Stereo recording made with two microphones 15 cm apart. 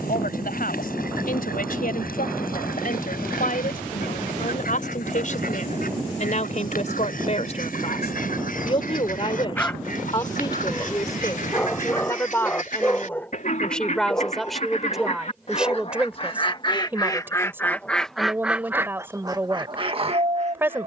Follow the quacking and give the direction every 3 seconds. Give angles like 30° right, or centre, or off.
80° left, 70° left, 70° left, 70° left, 60° left, 30° left, 30° right.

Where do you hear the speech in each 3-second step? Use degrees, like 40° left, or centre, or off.
70° left, 60° left, 50° left, 30° left, 10° left, 10° right, 10° right.